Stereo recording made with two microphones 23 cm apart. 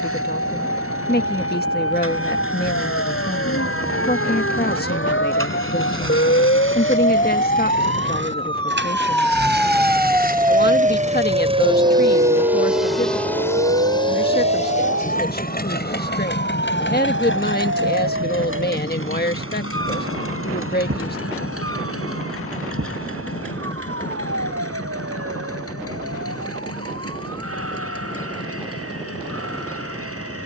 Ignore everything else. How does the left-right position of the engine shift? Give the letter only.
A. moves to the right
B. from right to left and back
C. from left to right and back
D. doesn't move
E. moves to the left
E.